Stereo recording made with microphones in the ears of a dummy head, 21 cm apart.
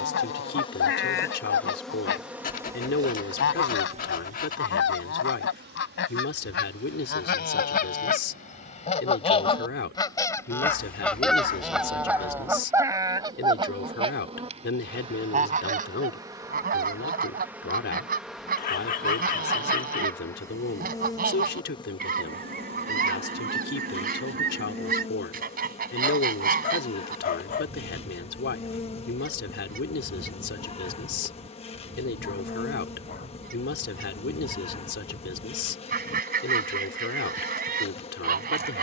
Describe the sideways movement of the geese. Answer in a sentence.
You can hear the geese go from the left side to the right.